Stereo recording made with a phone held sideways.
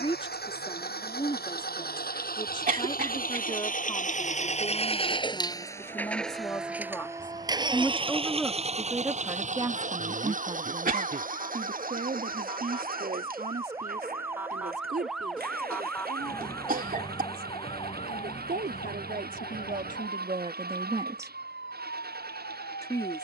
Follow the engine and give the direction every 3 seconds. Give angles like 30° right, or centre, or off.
70° left, 40° left, 20° right, 50° right, 60° right, 70° right, 70° right, 70° right.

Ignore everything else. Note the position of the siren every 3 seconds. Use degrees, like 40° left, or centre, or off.
60° right, 60° right, 50° right, 40° right, 20° right, 20° left, 60° left, 70° left.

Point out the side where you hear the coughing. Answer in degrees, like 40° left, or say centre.
60° right.